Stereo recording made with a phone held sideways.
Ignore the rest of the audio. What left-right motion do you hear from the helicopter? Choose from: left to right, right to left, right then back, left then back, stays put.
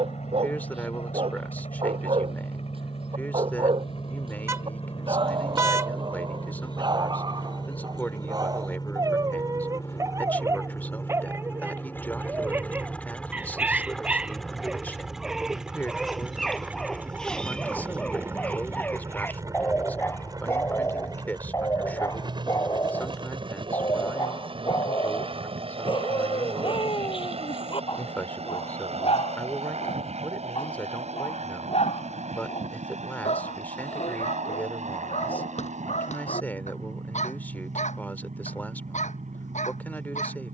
left to right.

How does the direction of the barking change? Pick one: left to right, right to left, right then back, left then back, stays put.
right to left.